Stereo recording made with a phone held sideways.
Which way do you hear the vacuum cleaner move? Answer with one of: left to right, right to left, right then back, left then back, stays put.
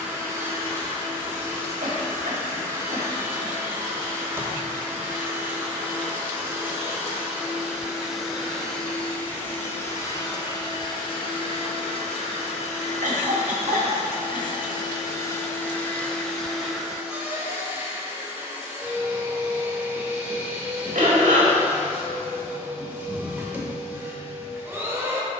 left then back.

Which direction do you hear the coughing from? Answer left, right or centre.
right.